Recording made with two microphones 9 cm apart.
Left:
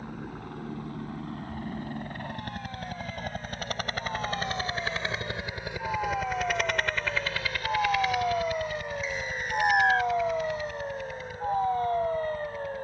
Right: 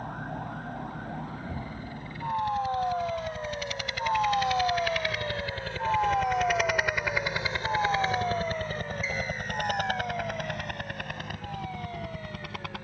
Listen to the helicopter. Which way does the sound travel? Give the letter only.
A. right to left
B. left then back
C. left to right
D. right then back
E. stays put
C.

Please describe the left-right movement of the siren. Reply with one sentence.
In this clip you hear the siren travel towards the left.